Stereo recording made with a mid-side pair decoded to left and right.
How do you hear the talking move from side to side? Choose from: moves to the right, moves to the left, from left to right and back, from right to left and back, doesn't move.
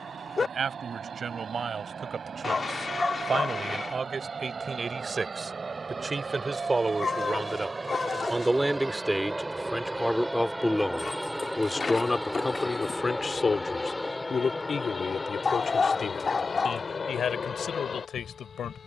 moves to the left.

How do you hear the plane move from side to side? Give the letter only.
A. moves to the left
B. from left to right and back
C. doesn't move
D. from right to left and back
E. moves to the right
A.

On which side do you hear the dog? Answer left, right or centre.
left.